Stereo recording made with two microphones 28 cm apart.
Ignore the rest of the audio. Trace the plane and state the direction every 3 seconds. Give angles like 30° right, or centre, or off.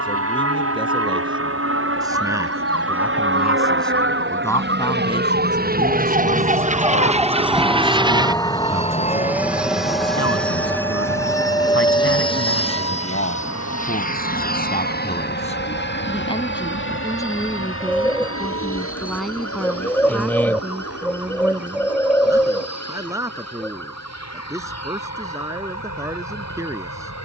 60° right, 40° right, 20° right, centre, 30° left, 40° left, 50° left, 60° left, 60° left.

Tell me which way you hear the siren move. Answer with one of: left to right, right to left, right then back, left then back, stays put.
right to left.